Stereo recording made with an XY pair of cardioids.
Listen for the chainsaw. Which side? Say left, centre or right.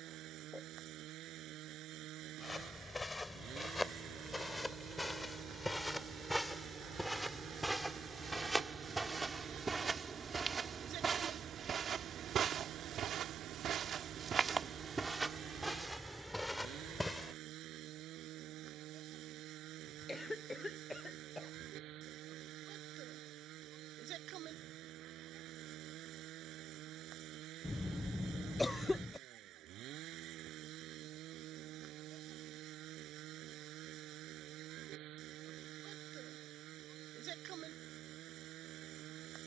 right.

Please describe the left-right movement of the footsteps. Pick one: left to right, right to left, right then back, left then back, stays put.
right then back.